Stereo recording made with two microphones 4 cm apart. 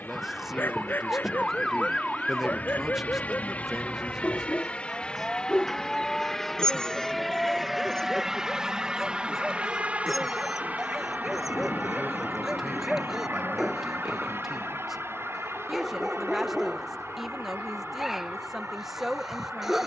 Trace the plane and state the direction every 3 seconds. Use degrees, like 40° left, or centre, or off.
50° left, 30° left, centre, 40° right, 60° right, 70° right, 70° right.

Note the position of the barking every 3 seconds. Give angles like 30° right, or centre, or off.
50° left, 30° left, 10° left, centre, 10° right, 10° right, 10° right.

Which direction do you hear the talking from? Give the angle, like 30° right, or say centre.
10° right.